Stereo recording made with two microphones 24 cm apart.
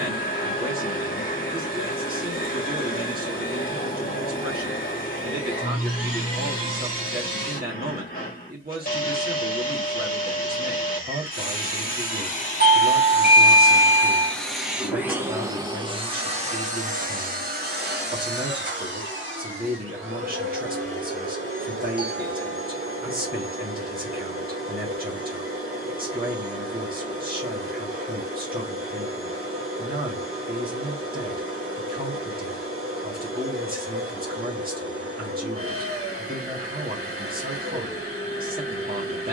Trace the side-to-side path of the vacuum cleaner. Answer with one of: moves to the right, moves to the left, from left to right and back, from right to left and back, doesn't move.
moves to the right.